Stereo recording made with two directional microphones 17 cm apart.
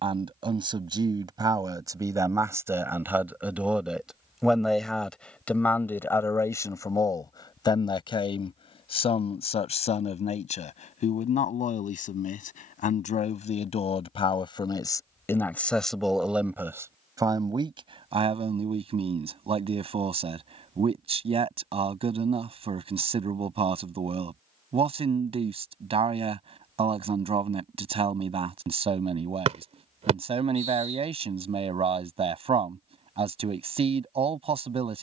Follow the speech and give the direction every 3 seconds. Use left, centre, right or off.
right, centre, left, left, left, centre, right, right, right, right, right, right.